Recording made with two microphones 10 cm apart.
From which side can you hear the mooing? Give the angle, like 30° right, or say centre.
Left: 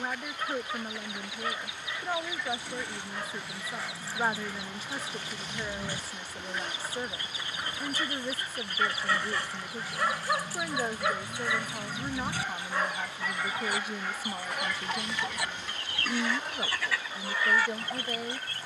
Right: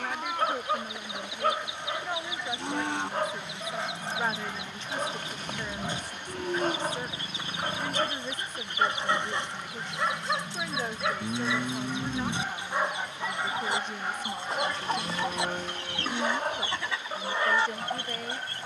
70° right.